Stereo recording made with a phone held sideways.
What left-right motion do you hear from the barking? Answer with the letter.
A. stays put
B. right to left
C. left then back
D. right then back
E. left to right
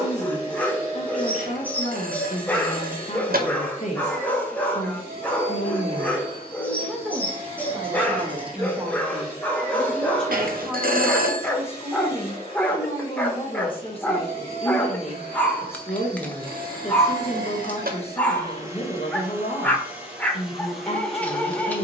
A.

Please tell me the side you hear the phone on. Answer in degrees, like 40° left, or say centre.
70° right.